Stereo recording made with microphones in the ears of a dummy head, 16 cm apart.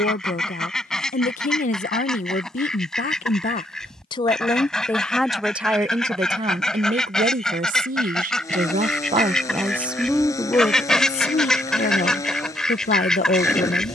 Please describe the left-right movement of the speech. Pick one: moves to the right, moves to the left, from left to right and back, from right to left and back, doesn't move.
from left to right and back.